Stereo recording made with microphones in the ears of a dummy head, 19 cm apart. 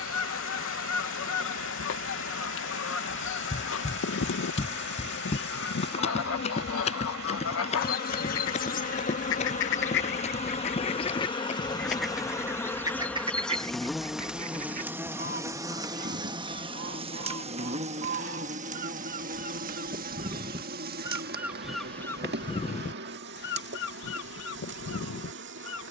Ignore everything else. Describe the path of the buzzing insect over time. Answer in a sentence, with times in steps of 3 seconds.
You can hear the buzzing insect on the left from 0 s, in the centre from 12 s and on the right from 15 s.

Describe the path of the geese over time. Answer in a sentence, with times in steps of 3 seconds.
You can hear the geese on the left from 0 s, on the right from 12 s and on the left from 21 s.